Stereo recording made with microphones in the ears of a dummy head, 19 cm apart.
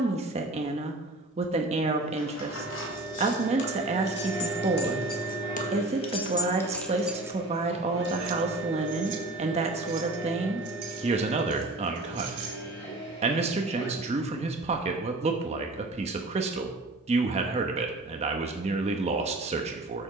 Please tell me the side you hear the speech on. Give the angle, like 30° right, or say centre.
30° right.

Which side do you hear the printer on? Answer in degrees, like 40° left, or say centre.
20° left.